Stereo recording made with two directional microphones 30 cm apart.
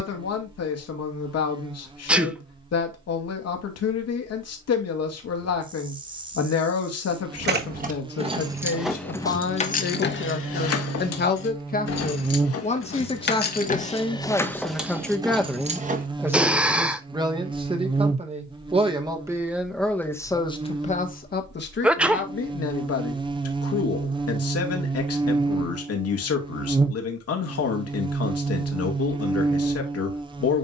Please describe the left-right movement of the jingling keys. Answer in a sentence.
You can hear the jingling keys go left and come back.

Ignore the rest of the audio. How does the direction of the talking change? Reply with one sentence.
You can hear the talking move from left to right and back again.